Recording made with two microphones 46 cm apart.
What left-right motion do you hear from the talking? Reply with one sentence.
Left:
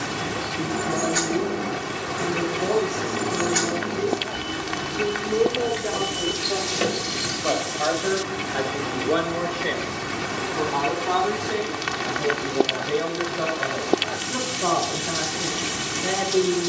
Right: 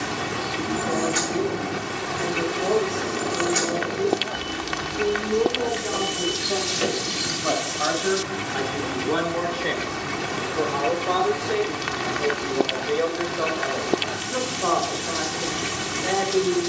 You can hear the talking move from left to right and back again.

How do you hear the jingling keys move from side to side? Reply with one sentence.
In this clip you hear the jingling keys move to the left.